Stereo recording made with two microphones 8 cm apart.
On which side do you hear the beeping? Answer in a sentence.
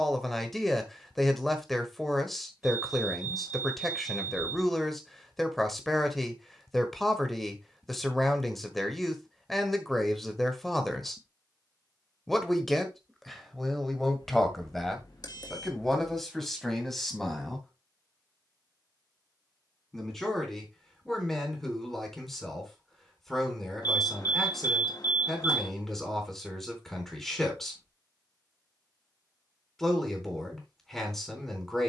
You can hear the beeping on the left.